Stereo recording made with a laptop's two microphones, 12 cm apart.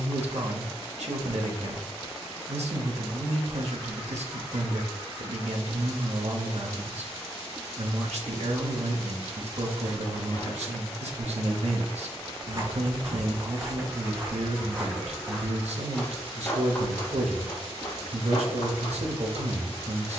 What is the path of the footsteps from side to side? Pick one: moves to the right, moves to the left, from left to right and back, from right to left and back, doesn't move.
moves to the left.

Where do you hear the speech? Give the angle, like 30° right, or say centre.
80° right.